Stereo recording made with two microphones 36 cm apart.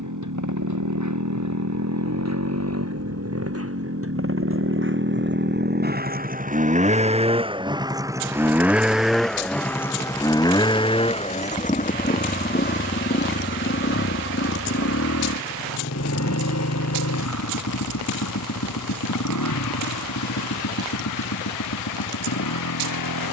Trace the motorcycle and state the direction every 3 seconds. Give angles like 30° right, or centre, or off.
50° right, 40° right, 10° right, 10° left, 30° left, 50° left, 60° left, 60° left.